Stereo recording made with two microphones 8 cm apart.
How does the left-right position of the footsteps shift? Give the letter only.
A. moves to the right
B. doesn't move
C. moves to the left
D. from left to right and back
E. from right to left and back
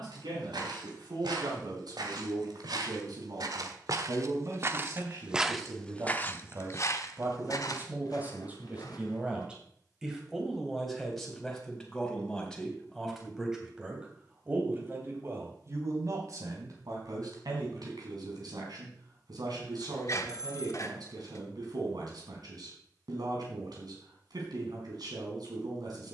C.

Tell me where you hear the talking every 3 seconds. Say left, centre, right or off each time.
right, right, right, centre, centre, right, right, right, right.